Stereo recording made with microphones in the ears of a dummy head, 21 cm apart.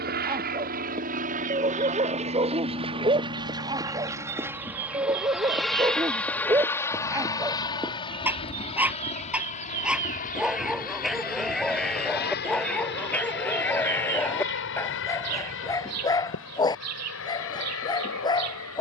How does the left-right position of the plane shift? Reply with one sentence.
In this clip you hear the plane travel towards the left.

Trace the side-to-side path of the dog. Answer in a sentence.
You can hear the dog move from right to left.